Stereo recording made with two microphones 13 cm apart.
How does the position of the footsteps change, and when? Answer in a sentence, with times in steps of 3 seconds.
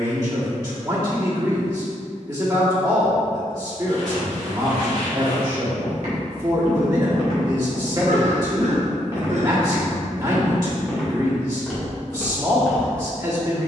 In this clip you hear the footsteps not at all from 0 s, on the right from 3 s and in the centre from 9 s.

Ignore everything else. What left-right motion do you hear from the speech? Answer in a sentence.
In this clip you hear the speech stay put.